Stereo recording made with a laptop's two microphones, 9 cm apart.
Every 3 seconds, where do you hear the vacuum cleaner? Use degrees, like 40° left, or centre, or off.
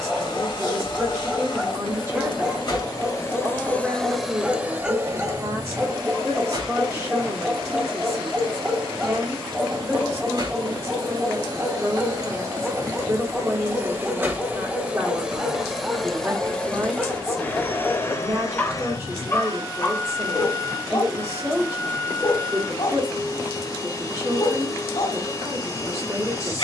50° left, 10° right, 60° right, 50° right, 30° right, 10° left, 40° left, 40° left, 40° left.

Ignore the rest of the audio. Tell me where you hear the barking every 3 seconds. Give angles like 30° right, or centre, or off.
10° right, 10° right, 10° right, 10° right, 10° right, centre, 30° left, 60° left, 60° left.